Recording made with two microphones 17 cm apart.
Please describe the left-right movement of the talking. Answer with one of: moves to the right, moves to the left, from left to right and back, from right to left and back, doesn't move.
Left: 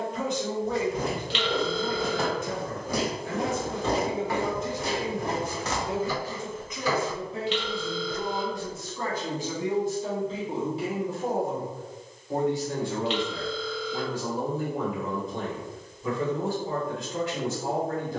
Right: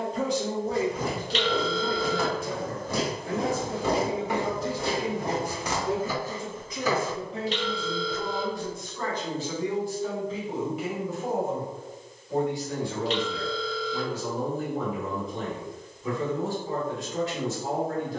moves to the left.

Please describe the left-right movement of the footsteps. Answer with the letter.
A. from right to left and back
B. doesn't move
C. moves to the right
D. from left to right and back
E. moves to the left
D.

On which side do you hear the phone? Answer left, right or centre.
right.